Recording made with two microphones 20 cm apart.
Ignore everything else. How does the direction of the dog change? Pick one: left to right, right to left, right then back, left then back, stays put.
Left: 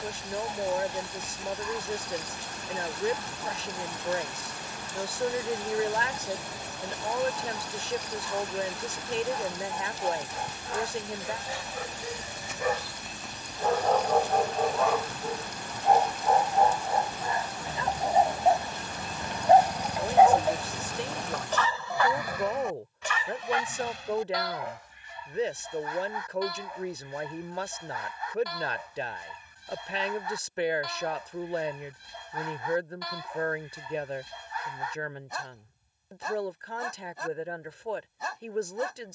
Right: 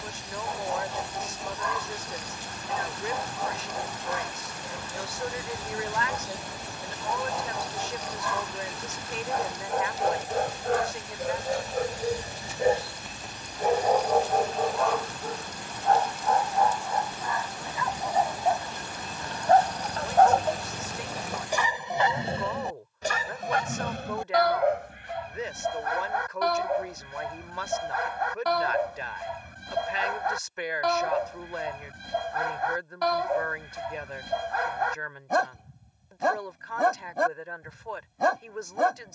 left then back.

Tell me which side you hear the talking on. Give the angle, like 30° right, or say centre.
30° left.